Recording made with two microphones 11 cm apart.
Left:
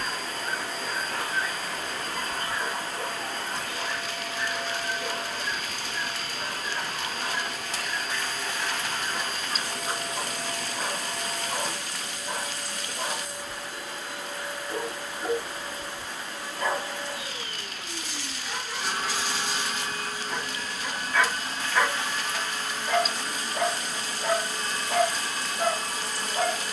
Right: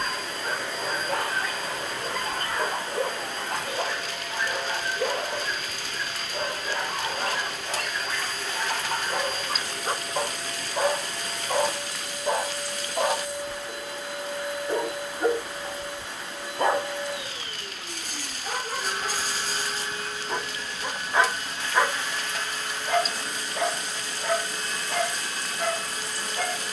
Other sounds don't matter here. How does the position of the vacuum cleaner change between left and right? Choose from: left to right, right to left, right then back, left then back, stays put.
stays put.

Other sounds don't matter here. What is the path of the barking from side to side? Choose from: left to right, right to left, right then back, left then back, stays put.
right to left.